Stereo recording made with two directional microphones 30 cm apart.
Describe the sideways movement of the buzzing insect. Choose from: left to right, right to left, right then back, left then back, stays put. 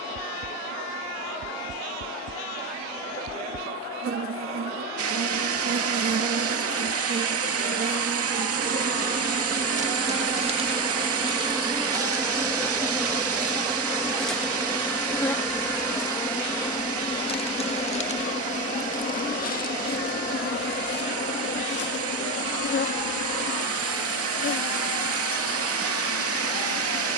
right to left.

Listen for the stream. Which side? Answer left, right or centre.
right.